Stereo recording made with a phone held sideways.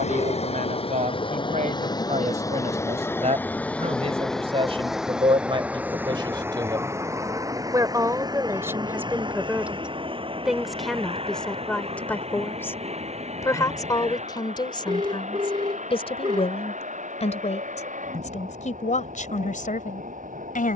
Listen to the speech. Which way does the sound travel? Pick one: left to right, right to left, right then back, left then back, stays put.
right to left.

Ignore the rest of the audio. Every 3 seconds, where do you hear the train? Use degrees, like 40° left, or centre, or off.
30° left, centre, 20° right, 30° right, 40° right, 50° right, 50° right.